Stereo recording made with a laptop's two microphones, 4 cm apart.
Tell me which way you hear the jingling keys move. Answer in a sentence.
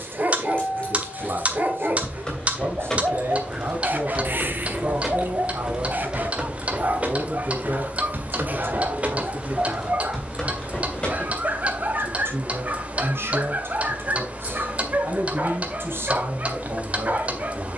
You can hear the jingling keys move from left to right and back again.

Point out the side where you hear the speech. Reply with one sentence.
In this clip you hear the speech on the right.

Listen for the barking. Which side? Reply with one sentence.
You can hear the barking on the right.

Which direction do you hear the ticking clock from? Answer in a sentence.
You can hear the ticking clock on the right.